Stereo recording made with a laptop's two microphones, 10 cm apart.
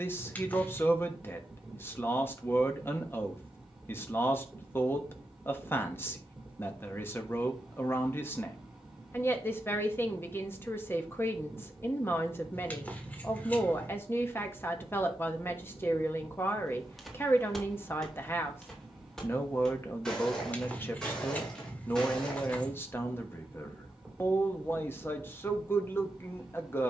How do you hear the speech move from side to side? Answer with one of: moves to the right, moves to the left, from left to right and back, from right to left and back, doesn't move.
doesn't move.